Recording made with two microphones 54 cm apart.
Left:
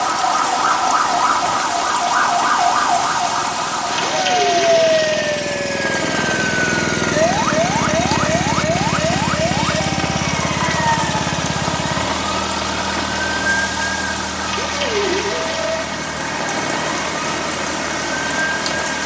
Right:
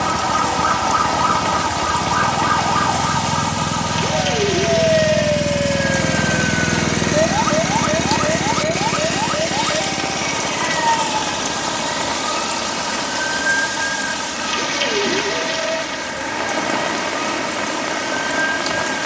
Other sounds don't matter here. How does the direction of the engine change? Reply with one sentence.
In this clip you hear the engine go from the right side to the left.